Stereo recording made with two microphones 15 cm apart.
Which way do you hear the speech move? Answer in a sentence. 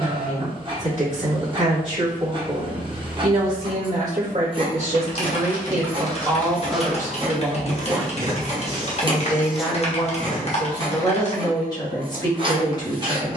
In this clip you hear the speech move to the left.